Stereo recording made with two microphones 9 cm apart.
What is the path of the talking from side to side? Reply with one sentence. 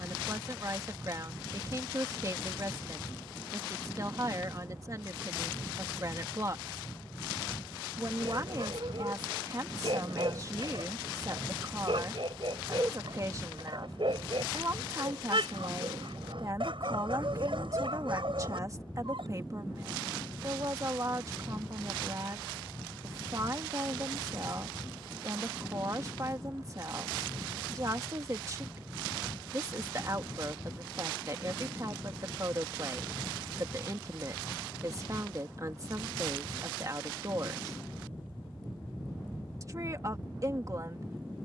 You can hear the talking stay in one place.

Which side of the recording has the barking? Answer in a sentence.
You can hear the barking on the right.